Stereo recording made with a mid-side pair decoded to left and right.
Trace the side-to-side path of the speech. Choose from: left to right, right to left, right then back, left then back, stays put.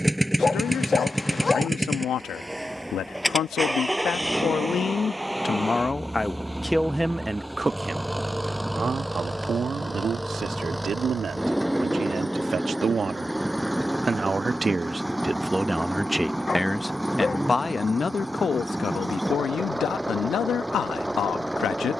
right then back.